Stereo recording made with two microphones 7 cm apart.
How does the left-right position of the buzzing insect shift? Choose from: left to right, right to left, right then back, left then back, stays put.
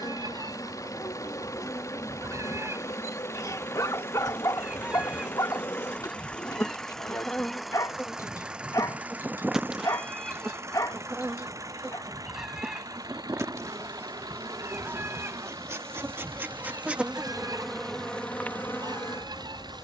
right then back.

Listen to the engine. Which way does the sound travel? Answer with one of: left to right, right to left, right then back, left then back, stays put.
left to right.